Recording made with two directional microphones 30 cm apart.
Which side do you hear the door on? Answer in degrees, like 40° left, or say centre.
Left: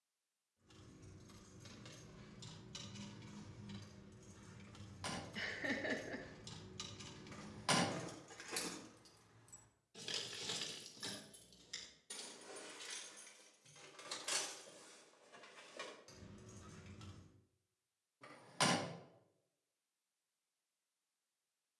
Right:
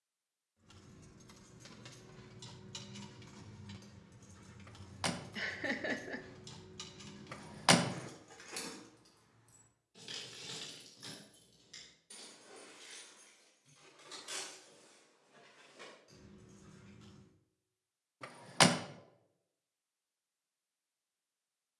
70° right.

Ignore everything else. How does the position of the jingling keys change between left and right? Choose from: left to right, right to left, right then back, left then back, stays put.
right to left.